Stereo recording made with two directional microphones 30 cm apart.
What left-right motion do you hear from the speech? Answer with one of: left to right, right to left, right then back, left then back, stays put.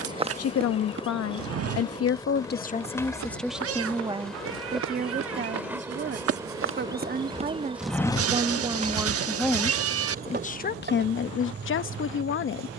right then back.